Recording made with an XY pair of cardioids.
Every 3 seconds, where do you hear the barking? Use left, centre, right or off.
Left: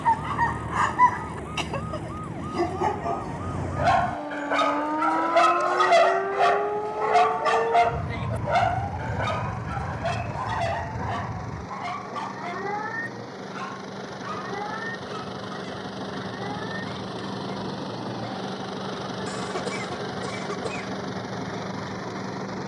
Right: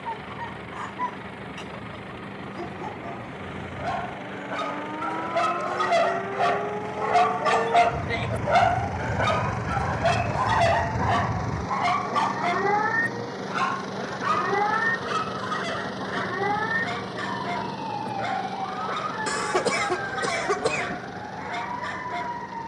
left, left, centre, right, right, right, right, right.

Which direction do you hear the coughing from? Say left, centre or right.
right.